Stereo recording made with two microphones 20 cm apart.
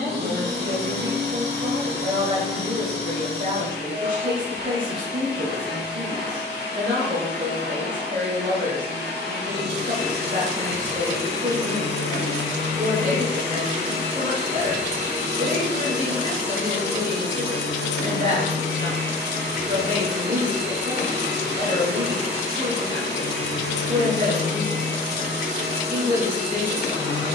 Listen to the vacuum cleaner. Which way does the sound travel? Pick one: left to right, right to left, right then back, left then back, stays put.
stays put.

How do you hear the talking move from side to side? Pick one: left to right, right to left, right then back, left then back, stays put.
stays put.